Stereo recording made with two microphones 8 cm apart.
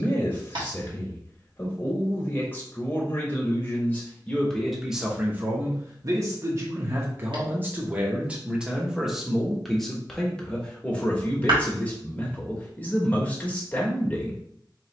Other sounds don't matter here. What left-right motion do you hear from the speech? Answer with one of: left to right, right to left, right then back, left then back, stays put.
right then back.